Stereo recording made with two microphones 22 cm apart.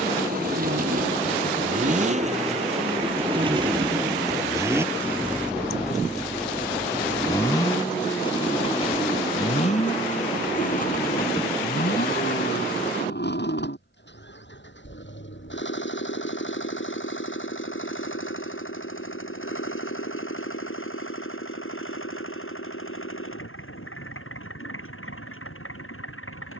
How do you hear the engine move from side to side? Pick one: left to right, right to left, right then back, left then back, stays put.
right to left.